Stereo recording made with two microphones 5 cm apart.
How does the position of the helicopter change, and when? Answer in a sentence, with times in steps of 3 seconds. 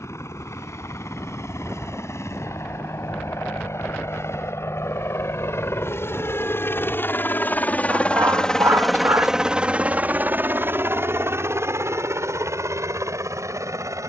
In this clip you hear the helicopter on the left from 0 s and on the right from 9 s.